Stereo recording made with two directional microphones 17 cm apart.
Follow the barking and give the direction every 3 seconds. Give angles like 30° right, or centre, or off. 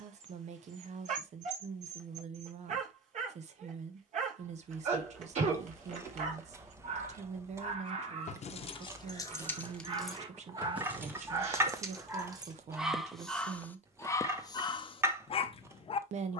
50° right, 50° right, 40° right, 30° right, 10° left, 30° left.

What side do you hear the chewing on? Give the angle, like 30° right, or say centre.
20° right.